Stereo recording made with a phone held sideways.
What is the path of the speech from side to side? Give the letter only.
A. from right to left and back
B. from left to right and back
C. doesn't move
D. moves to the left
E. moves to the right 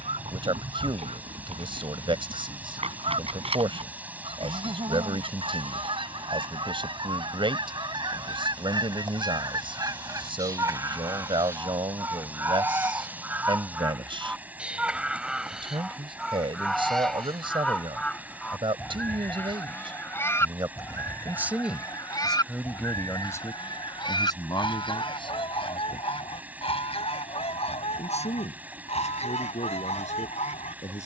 D.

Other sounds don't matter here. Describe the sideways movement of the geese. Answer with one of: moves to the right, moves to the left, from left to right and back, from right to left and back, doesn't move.
moves to the left.